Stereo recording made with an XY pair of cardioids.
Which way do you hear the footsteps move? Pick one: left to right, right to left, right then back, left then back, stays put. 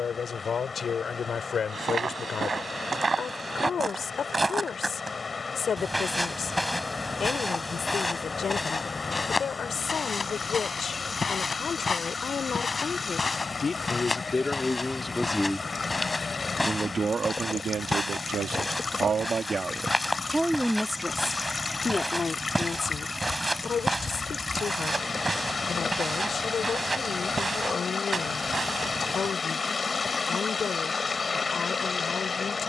left then back.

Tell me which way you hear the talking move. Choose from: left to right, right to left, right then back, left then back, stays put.
right then back.